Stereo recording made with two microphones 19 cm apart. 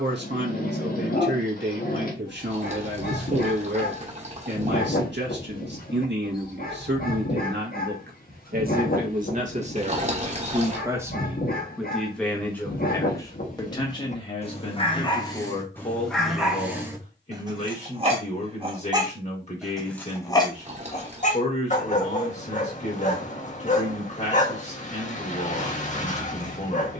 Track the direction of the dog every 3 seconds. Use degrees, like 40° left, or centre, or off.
50° left, 50° left, 50° left, 50° left, 40° left, centre, centre, 40° left, 40° left.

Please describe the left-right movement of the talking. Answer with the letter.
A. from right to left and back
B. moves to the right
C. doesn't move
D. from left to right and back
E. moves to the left
E.